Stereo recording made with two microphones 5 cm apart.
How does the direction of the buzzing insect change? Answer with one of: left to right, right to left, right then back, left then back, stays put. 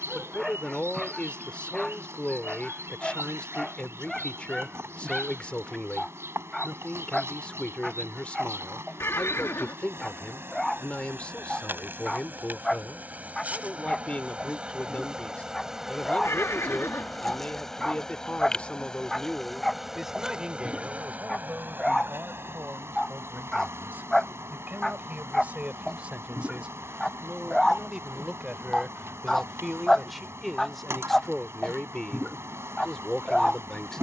left then back.